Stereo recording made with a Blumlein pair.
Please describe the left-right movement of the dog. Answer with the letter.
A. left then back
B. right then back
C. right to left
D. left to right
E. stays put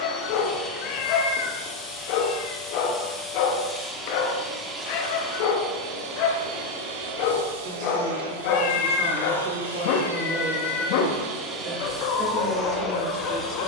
E.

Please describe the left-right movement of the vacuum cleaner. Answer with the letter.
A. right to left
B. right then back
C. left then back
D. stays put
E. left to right
B.